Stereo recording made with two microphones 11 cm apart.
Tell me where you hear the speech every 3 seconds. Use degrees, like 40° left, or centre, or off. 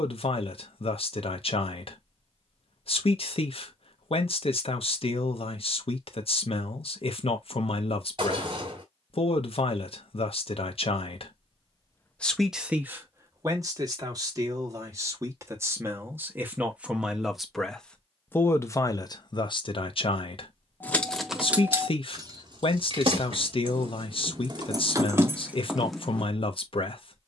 60° left, 60° left, 60° left, 60° left, 20° right, 10° right, 40° left, 60° left, 60° left.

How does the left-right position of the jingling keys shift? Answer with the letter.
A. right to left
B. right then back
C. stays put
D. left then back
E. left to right
B.